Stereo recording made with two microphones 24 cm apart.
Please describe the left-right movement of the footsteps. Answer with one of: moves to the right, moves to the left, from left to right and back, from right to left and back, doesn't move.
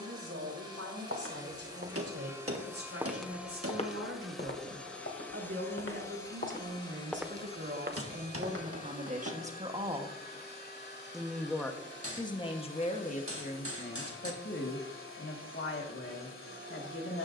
from right to left and back.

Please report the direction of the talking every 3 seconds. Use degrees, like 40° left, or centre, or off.
70° right, 60° right, 50° right, 20° right, 40° left, 60° left.